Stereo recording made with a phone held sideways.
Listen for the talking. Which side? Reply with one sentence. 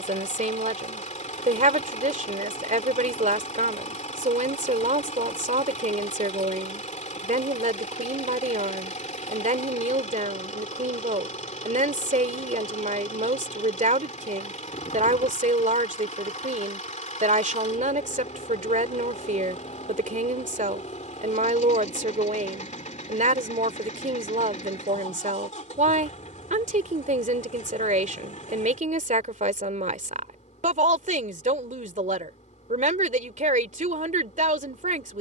You can hear the talking on the right.